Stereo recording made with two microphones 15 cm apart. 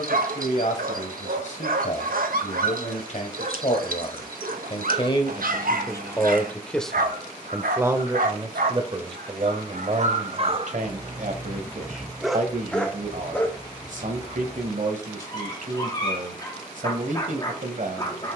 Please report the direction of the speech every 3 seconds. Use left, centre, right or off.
left, left, centre, right, right, right.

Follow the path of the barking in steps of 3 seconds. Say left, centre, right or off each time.
right, right, right, right, centre, left.